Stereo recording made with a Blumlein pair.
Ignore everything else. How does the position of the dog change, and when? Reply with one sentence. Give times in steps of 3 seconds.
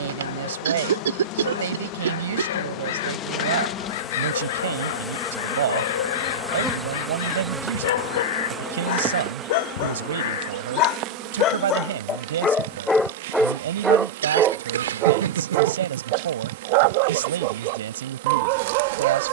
You can hear the dog on the left from 0 s, in the centre from 12 s and on the right from 15 s.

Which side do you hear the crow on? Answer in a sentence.
In this clip you hear the crow on the left.